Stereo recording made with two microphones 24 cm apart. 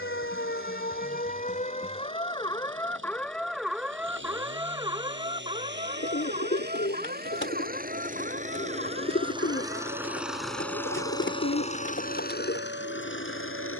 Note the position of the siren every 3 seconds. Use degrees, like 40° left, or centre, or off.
30° left, 10° right, 40° right, 50° right, 50° right.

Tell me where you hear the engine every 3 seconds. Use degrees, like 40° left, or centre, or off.
60° right, 50° right, 40° right, centre, 50° left.